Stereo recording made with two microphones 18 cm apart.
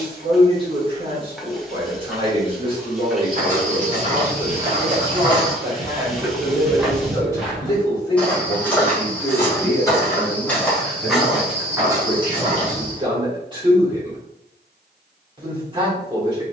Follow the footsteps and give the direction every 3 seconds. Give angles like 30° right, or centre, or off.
off, 40° right, centre, 10° left, 40° right, off.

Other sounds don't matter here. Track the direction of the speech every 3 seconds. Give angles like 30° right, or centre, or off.
30° right, 30° right, 20° left, 10° left, 20° right, 30° right.